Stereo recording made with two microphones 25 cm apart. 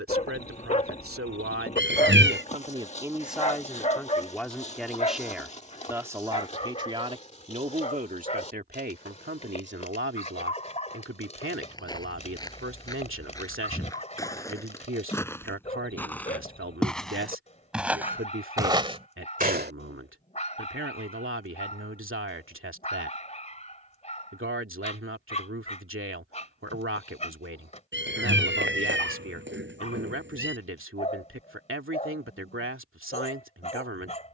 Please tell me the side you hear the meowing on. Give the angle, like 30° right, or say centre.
50° right.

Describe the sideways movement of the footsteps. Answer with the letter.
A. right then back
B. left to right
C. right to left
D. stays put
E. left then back
B.